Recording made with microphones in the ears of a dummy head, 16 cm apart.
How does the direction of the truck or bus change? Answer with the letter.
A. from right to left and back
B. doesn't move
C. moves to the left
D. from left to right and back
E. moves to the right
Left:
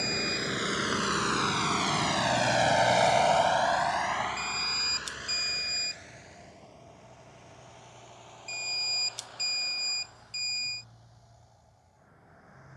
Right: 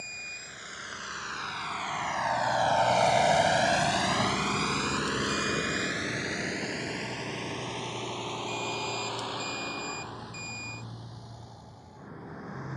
E.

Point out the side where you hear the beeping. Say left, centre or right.
left.